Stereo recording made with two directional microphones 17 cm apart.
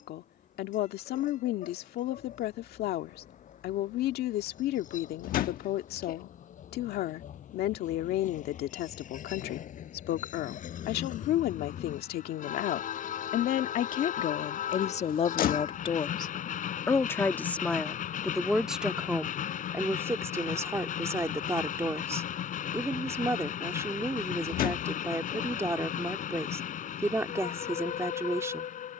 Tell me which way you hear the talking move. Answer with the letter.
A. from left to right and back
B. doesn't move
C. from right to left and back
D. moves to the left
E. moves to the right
E.